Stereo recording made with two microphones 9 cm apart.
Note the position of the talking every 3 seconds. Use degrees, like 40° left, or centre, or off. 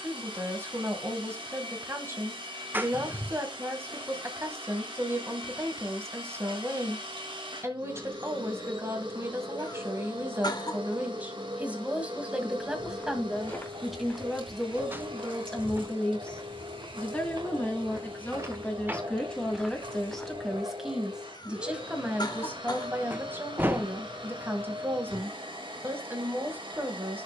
30° right, 30° right, 30° right, 20° right, centre, 10° left, 10° left, 20° right, 20° right.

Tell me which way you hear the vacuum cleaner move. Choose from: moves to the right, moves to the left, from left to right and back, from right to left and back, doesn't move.
doesn't move.